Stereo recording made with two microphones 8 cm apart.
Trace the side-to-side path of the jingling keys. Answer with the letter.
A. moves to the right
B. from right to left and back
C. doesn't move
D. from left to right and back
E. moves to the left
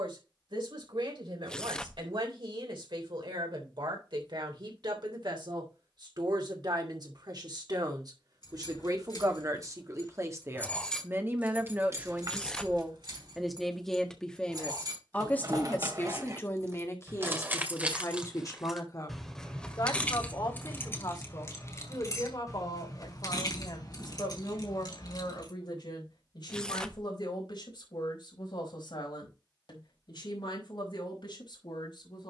D.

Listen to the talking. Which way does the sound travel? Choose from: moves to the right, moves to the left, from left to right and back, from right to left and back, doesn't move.
moves to the left.